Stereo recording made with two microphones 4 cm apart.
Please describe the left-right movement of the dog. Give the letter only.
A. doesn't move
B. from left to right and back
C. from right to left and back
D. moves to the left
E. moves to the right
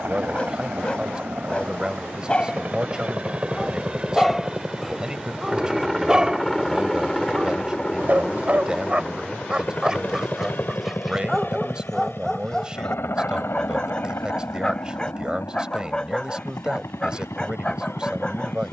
B.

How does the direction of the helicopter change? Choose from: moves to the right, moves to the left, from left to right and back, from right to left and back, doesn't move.
moves to the left.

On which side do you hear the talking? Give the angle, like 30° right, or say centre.
20° right.